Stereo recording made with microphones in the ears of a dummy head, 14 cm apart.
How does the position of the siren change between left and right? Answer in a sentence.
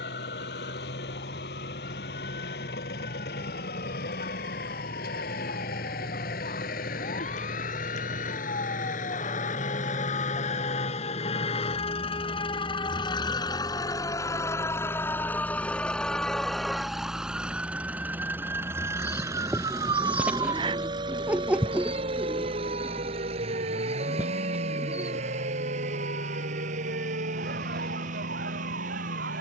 You can hear the siren travel towards the right.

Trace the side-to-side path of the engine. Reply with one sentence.
You can hear the engine travel towards the right.